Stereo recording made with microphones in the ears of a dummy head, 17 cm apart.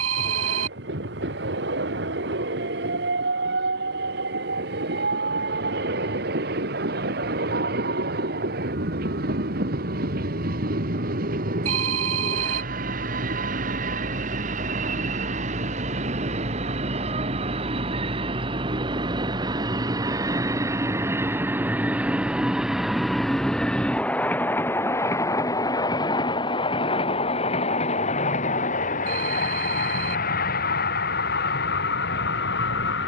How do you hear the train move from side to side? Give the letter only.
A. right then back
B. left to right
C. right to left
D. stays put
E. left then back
C.